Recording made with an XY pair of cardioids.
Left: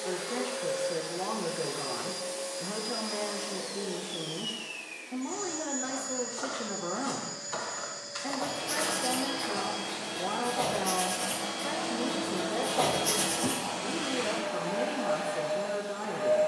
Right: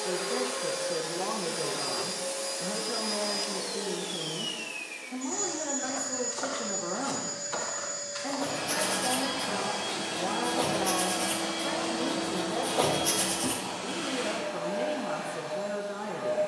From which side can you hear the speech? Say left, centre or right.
centre.